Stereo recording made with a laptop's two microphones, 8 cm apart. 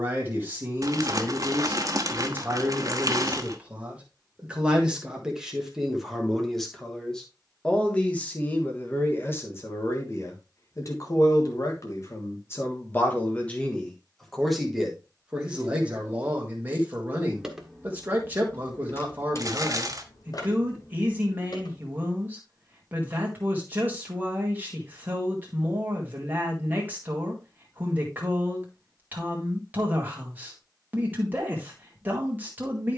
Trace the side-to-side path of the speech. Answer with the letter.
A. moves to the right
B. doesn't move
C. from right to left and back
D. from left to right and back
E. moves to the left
C.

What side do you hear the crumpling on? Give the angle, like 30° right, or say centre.
50° right.